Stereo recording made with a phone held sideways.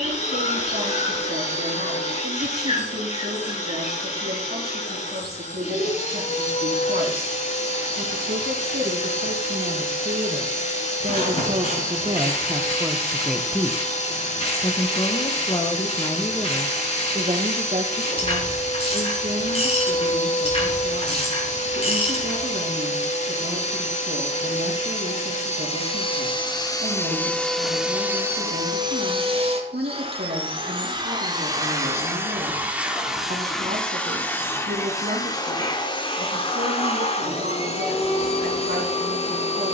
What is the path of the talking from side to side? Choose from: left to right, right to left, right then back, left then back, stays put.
left then back.